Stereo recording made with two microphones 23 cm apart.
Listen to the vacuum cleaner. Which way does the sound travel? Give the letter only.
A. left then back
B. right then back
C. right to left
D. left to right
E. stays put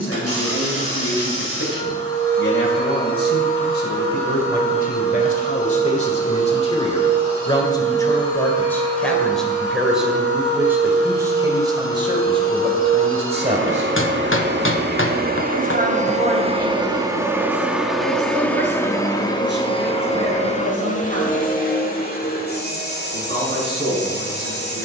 C.